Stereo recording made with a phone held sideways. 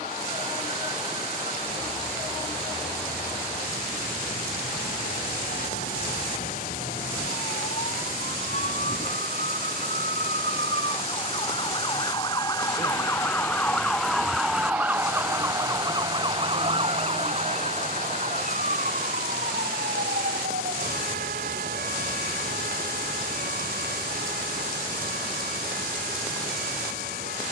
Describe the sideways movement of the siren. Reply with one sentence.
You can hear the siren move from left to right.